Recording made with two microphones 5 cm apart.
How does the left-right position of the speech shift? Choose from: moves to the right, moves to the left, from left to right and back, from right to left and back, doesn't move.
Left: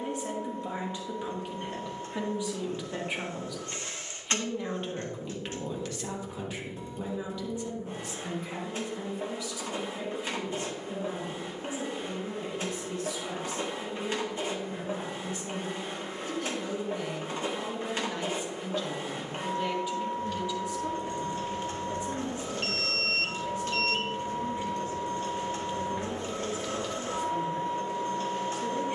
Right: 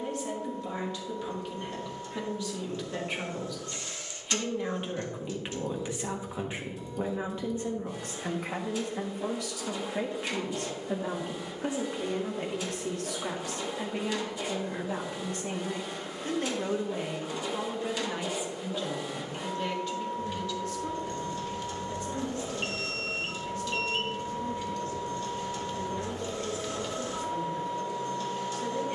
from left to right and back.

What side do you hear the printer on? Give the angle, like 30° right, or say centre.
40° left.